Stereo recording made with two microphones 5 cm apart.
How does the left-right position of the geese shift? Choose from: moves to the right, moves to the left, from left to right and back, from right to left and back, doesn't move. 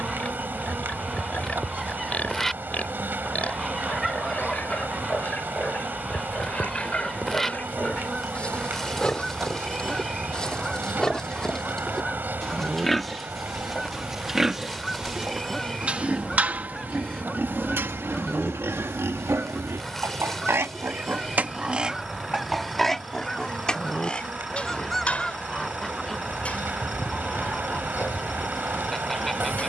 doesn't move.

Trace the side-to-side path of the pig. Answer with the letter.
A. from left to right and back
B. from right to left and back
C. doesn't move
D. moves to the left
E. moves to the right
A.